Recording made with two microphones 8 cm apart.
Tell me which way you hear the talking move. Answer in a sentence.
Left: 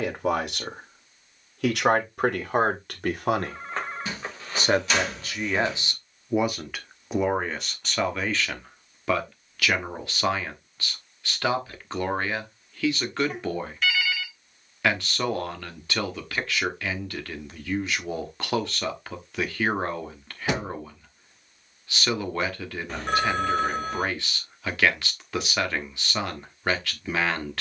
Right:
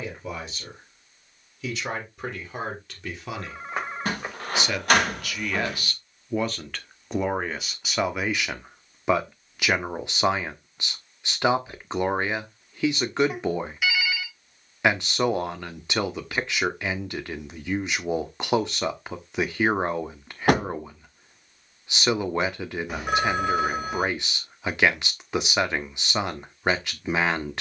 You can hear the talking go from the left side to the right.